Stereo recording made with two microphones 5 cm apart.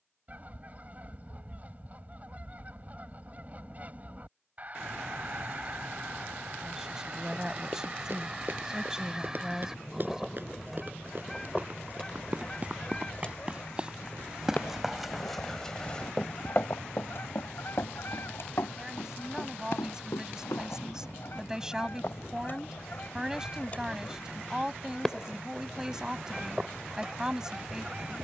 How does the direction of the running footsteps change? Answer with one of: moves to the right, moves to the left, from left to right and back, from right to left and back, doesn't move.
moves to the left.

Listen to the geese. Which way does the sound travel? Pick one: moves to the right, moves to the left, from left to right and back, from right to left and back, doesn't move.
from right to left and back.